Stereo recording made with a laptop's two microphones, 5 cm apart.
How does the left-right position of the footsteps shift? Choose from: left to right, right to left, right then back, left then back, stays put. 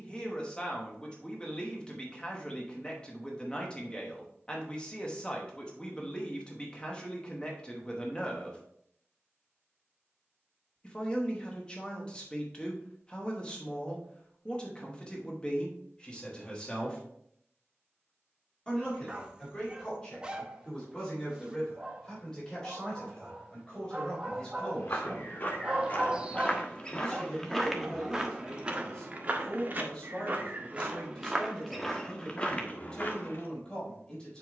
right then back.